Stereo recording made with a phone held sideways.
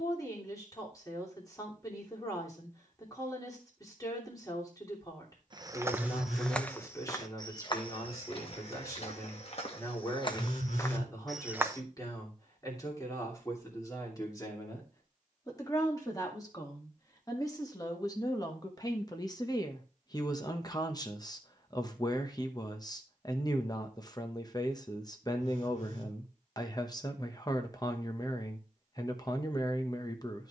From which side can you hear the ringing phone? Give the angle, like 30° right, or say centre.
60° left.